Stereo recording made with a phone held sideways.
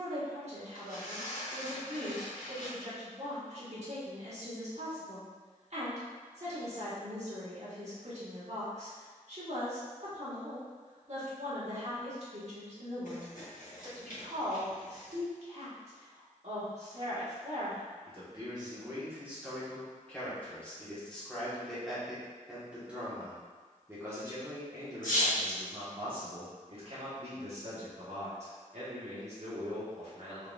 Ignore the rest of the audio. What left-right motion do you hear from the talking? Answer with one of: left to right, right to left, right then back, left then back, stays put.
left then back.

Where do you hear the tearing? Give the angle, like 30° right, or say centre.
70° left.